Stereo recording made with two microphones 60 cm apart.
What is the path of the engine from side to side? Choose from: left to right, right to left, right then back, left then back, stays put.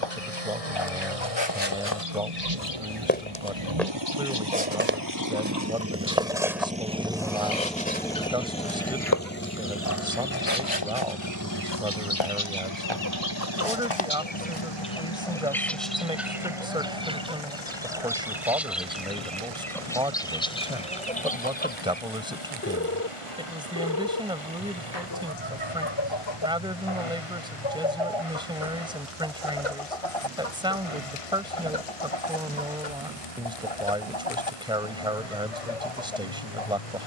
right to left.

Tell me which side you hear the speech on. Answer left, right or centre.
centre.